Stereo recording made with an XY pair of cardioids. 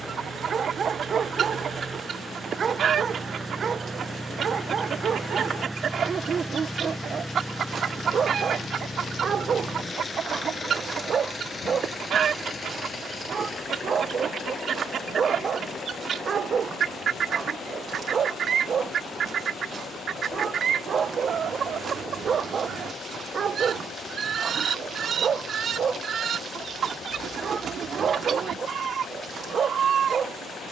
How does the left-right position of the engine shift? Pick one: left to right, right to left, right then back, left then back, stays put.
right to left.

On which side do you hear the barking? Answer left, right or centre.
right.